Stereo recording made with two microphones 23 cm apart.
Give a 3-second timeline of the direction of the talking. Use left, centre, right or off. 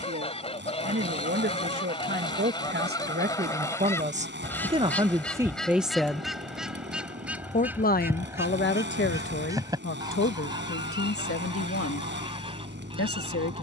right, right, left, left, left.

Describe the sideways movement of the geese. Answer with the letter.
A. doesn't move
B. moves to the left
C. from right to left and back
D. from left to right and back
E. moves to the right
E.